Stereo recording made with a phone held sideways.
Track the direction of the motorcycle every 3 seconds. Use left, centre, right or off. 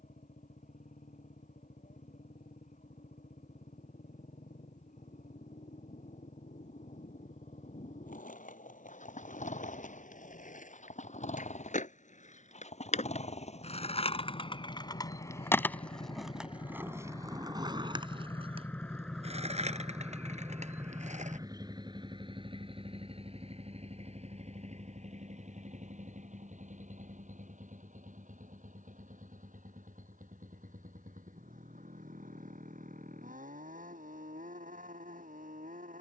left, left, left, left, left, left, centre, right, right, right, right, right.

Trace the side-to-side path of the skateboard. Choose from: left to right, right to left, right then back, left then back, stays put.
left to right.